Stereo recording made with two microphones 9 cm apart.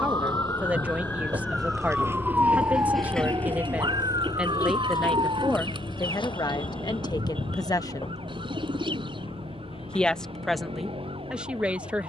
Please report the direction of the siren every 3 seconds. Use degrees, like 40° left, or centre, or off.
10° left, 50° right, 70° right, 70° right.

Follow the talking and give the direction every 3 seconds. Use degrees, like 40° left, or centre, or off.
20° right, centre, 50° left, centre.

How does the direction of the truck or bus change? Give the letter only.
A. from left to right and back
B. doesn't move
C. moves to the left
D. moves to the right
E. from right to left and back
C.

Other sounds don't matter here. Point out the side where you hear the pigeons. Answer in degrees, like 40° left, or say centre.
70° right.